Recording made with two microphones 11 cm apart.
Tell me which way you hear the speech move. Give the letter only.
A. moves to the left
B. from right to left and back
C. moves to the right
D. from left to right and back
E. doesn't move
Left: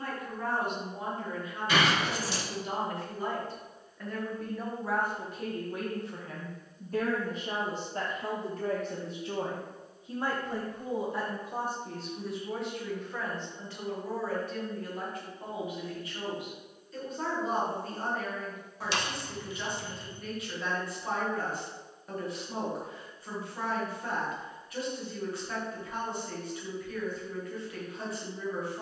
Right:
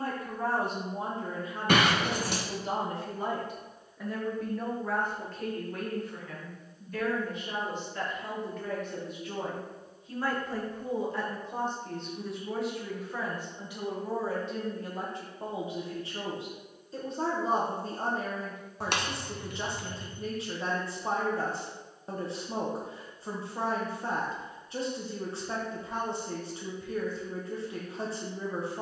B.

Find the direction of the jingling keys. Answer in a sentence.
You can hear the jingling keys on the right.